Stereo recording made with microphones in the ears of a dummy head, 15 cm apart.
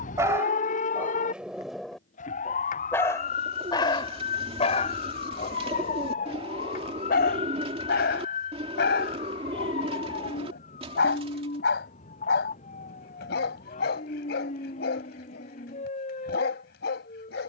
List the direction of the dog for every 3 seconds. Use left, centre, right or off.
centre, left, left, left, left, left.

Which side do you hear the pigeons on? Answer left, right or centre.
right.